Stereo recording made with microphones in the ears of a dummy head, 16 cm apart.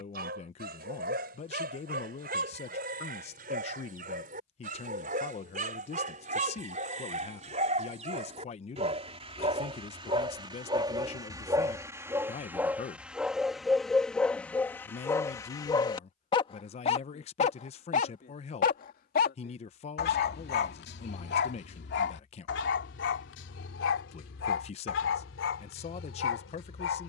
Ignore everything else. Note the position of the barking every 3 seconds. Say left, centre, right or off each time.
right, right, right, right, centre, left, left, left, left.